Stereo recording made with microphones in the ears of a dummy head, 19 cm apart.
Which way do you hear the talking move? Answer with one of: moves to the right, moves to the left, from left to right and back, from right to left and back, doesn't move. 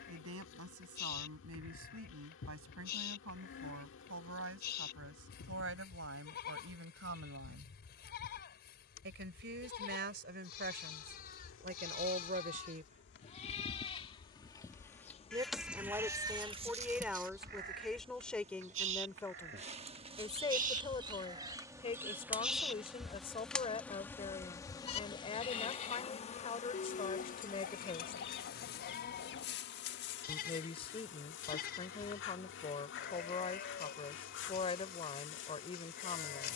moves to the left.